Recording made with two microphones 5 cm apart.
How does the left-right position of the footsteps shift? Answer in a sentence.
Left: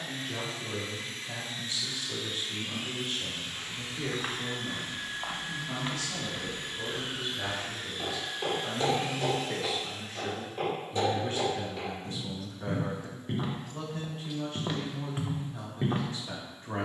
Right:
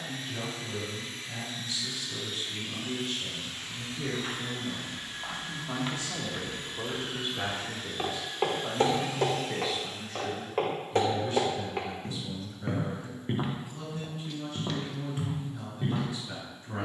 In this clip you hear the footsteps go right and come back.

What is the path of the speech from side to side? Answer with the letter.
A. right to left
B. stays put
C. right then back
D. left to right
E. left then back
C.